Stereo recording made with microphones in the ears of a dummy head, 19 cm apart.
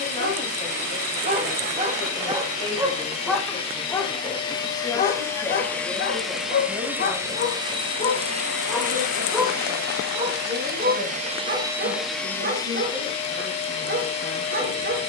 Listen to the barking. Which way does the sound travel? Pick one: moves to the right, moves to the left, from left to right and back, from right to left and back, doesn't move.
from right to left and back.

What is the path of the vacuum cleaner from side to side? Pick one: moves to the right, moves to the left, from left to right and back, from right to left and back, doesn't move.
from left to right and back.